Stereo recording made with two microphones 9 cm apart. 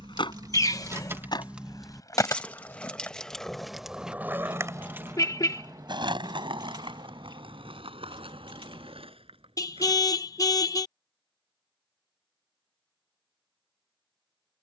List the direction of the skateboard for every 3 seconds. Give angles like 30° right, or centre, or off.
40° left, 20° right, 70° right, 80° right, off.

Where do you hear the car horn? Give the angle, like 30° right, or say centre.
40° left.